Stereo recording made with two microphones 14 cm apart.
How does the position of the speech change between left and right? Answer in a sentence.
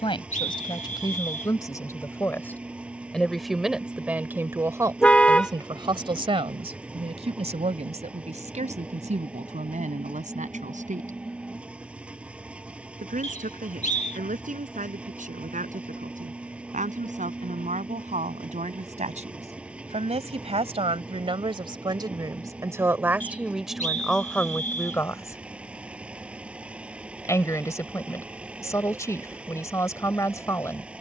You can hear the speech move from left to right and back again.